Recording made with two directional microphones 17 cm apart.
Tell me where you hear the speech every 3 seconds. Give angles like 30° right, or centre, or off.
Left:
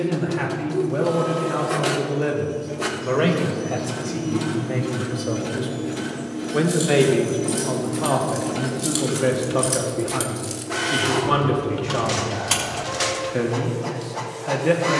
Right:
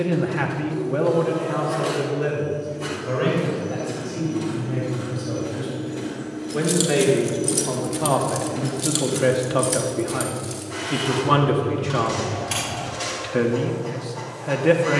10° left, 50° left, 10° left, 10° right, 10° right.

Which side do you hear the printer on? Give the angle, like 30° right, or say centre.
50° left.